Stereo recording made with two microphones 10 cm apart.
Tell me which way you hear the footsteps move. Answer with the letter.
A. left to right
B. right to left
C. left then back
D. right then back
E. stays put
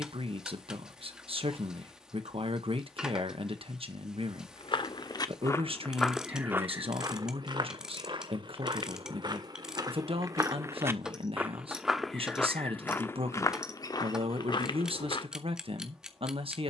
D.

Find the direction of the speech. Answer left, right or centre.
right.